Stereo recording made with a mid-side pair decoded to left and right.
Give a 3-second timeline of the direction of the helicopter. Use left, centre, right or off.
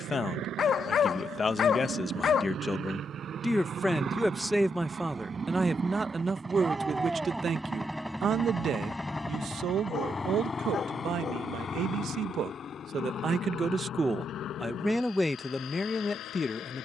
right, right, centre, left, left, left.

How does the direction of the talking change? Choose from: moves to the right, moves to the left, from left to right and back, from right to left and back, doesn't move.
from left to right and back.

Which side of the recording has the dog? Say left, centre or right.
left.